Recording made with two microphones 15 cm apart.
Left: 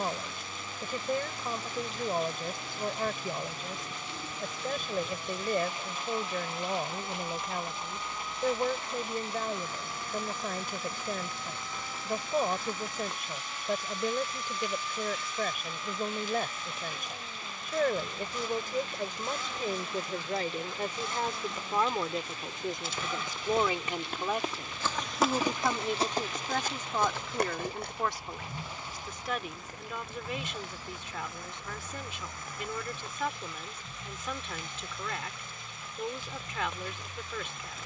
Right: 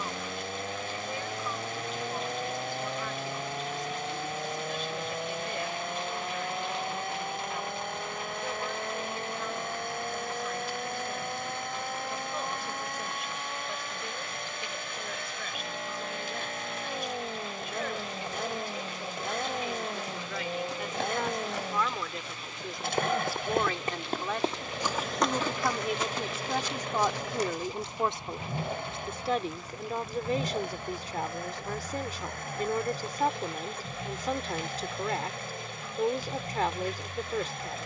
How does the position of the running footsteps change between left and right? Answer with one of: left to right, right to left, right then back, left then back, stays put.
right to left.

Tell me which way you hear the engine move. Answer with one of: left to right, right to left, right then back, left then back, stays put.
stays put.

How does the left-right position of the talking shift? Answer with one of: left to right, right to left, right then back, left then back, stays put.
left to right.